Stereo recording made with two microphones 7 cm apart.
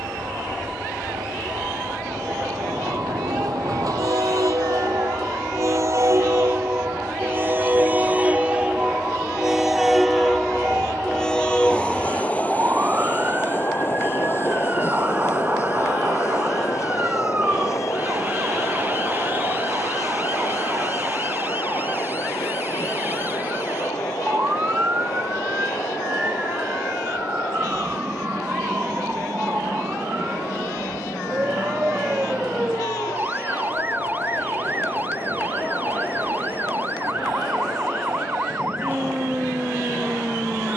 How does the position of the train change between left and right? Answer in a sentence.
In this clip you hear the train move from right to left.